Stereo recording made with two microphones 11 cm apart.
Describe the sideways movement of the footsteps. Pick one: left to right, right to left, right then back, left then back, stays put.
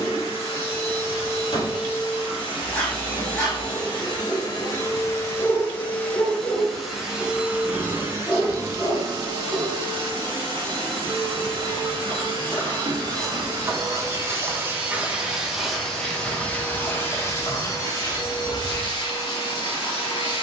right then back.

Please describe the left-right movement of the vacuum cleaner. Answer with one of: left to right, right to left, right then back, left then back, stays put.
right then back.